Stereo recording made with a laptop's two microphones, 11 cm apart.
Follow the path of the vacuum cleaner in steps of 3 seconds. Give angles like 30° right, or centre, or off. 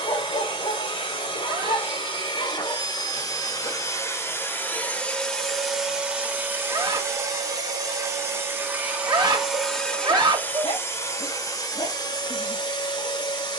50° left, 20° left, 20° right, 10° left, 40° left.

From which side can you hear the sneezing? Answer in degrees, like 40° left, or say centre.
40° right.